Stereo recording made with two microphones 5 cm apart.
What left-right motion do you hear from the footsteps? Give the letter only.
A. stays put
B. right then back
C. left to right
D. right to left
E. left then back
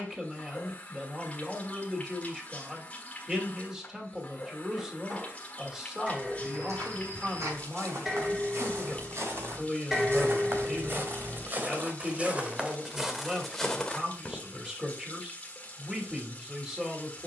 D.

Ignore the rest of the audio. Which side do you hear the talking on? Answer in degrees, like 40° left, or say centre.
20° right.